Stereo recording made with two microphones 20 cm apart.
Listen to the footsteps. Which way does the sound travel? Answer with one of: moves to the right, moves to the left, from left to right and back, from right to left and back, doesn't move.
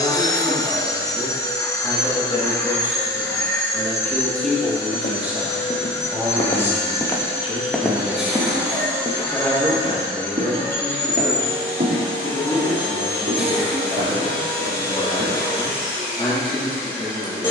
moves to the right.